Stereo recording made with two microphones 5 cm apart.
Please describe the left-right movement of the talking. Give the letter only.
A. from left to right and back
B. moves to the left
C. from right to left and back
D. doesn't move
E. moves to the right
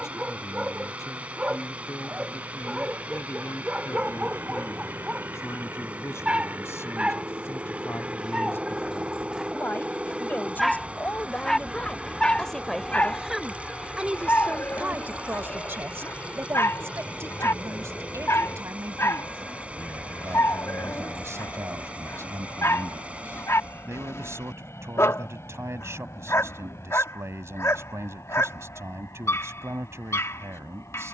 E.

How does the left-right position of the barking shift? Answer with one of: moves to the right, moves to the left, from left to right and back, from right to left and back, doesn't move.
moves to the left.